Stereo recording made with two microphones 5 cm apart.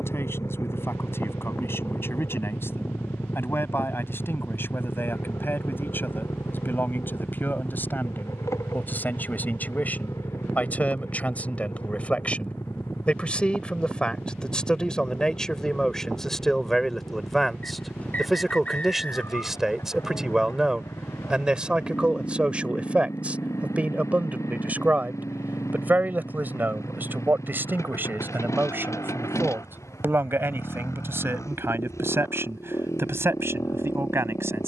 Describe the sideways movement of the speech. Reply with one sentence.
In this clip you hear the speech move to the right.